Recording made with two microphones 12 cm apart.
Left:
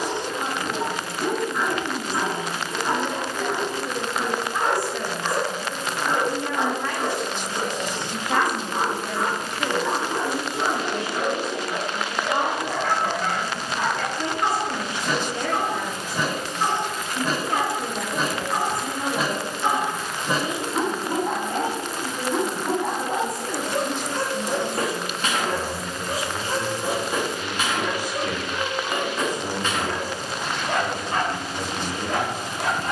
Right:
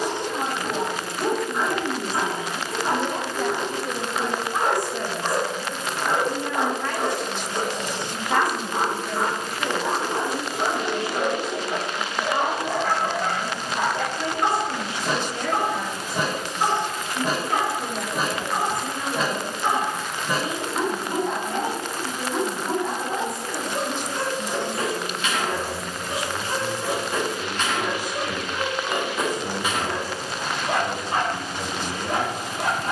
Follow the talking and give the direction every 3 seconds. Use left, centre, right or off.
right, right, centre, left, left, left, left, left, left, left, left.